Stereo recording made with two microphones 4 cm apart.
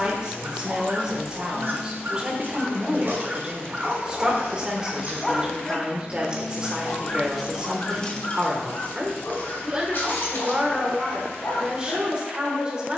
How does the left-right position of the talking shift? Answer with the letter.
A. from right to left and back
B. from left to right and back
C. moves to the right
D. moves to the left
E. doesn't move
E.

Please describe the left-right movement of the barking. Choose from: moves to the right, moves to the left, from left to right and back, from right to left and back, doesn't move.
moves to the left.